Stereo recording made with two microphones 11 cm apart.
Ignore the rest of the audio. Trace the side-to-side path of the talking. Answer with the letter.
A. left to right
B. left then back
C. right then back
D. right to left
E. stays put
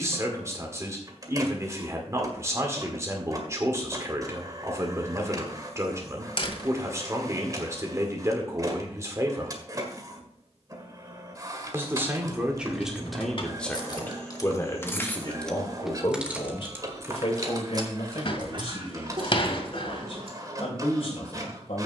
D.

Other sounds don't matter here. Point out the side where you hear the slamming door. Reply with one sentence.
In this clip you hear the slamming door on the left.